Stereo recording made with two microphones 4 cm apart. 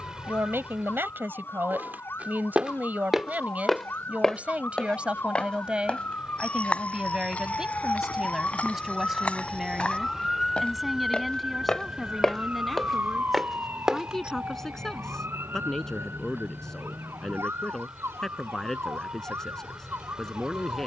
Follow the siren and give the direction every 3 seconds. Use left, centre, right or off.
left, left, left, centre, right, right, right.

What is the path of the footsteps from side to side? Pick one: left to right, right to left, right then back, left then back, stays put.
left then back.